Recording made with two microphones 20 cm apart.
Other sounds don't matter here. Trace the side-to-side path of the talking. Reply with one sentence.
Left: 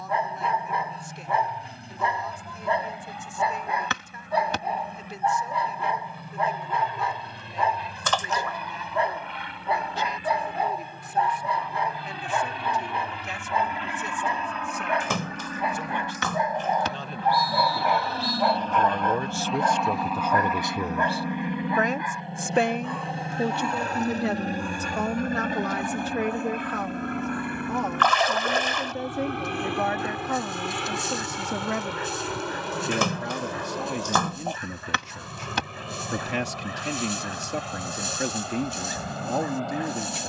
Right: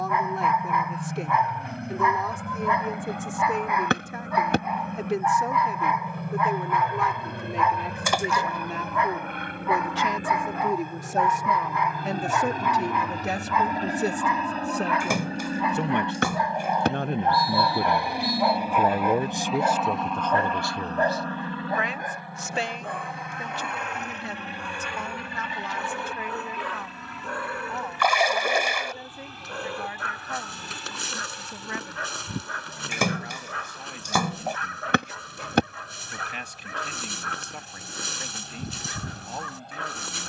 You can hear the talking move to the left.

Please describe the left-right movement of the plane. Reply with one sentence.
You can hear the plane move to the left.